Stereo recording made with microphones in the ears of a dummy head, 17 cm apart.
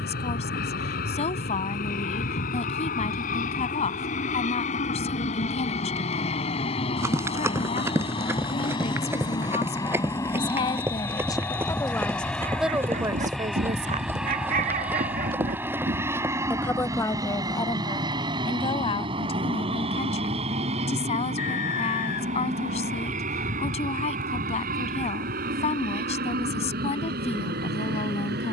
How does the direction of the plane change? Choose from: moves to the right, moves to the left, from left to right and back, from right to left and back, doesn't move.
moves to the right.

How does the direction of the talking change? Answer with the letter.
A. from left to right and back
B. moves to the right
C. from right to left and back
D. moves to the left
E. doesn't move
A.